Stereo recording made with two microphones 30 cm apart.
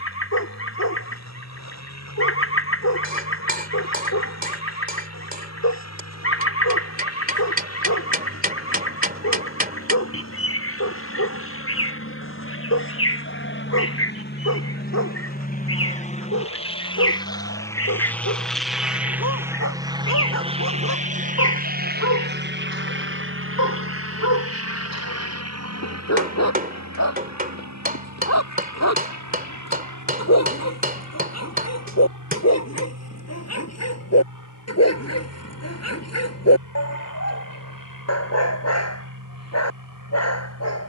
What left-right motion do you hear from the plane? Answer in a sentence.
You can hear the plane move to the right.